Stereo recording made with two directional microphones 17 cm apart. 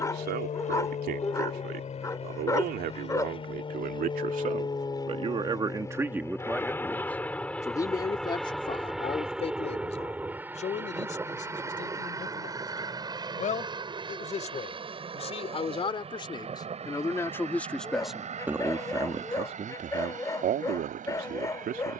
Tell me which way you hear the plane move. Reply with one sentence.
In this clip you hear the plane travel towards the right.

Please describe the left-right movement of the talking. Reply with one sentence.
In this clip you hear the talking go left and come back.